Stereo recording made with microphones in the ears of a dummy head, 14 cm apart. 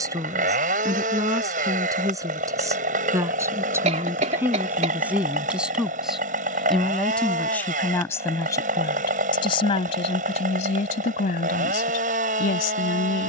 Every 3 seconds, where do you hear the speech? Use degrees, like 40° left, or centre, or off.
20° right, 10° right, 10° left, 40° left, 60° left.